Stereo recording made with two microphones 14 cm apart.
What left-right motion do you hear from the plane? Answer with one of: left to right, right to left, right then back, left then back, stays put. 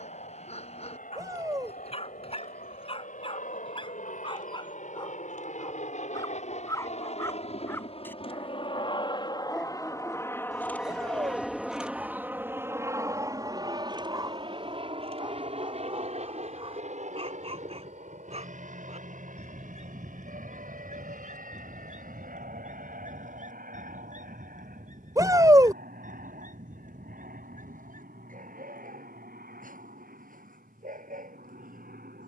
left to right.